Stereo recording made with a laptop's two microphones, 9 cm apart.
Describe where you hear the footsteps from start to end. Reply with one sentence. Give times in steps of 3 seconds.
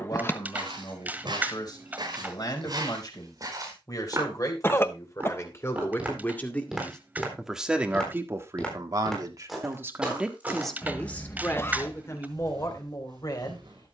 In this clip you hear the footsteps on the right from 0 s, in the centre from 6 s and on the right from 12 s.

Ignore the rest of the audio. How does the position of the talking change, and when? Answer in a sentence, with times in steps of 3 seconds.
You can hear the talking on the left from 0 s, in the centre from 6 s and on the left from 12 s.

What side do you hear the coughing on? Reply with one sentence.
In this clip you hear the coughing on the left.